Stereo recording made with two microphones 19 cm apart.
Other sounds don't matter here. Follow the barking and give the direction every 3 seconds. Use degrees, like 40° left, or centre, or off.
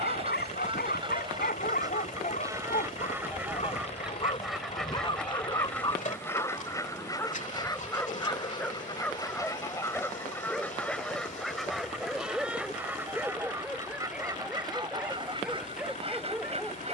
50° left, 30° left, 10° left, centre, centre, 10° right.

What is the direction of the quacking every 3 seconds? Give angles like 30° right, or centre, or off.
20° right, centre, 20° left, 10° left, 10° right, 30° right.